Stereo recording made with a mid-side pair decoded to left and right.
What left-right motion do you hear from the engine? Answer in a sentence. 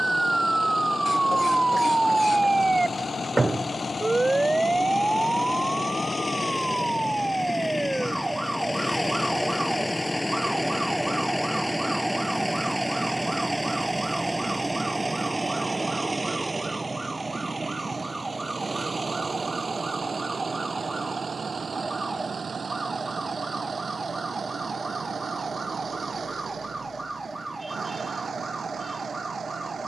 In this clip you hear the engine travel towards the right.